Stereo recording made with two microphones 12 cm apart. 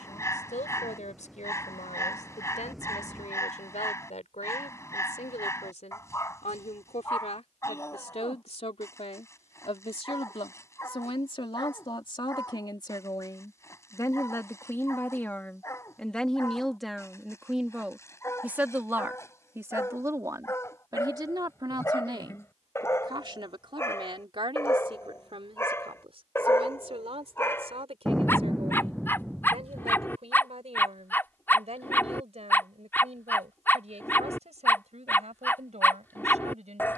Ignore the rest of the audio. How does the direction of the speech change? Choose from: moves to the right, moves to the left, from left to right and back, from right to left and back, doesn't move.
moves to the right.